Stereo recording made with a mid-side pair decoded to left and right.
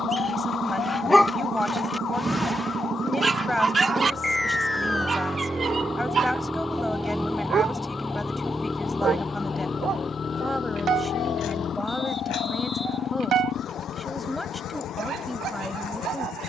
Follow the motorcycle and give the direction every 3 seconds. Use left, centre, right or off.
right, right, centre, left, left, left.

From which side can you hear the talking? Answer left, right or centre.
centre.